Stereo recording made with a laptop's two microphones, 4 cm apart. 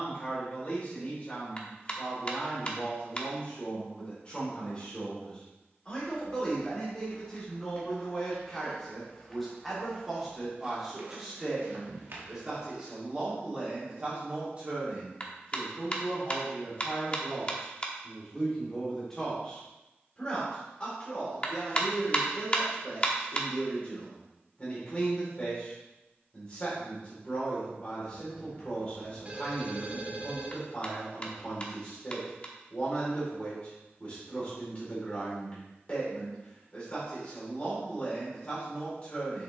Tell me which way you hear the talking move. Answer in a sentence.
In this clip you hear the talking go right and come back.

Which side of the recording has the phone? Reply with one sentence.
In this clip you hear the phone on the right.